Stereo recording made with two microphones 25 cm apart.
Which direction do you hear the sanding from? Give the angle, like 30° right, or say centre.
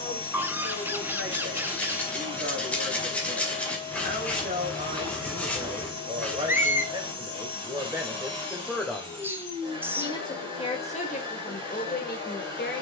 10° left.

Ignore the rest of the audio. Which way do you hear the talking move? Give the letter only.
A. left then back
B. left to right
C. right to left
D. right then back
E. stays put
C.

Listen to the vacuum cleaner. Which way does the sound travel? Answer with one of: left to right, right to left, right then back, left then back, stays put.
stays put.